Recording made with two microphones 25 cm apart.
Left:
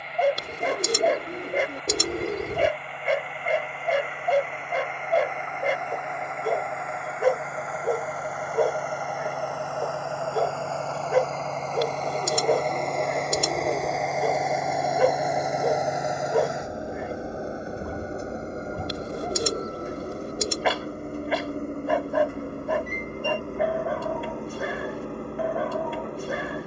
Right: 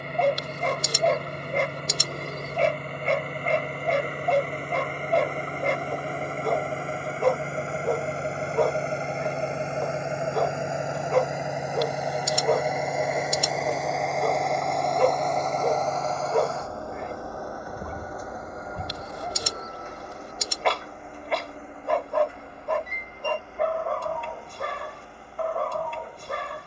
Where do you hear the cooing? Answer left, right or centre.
left.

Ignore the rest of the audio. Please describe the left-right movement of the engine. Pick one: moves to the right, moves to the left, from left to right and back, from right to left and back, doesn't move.
moves to the left.